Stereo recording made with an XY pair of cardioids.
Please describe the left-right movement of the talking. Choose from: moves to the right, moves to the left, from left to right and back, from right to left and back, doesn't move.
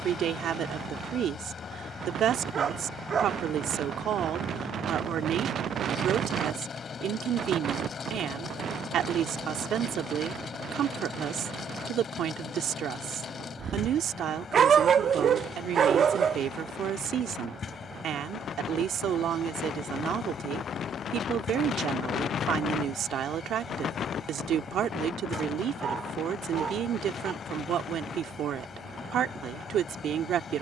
doesn't move.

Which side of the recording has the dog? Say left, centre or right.
right.